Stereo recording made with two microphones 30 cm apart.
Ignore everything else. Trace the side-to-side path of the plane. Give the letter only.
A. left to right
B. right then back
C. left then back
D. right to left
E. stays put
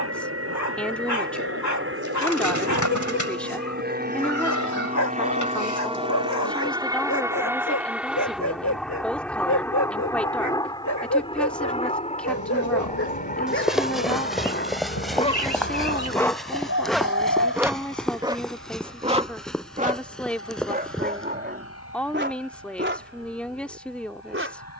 D.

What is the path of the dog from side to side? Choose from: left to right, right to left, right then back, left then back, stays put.
left to right.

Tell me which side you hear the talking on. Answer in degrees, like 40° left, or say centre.
centre.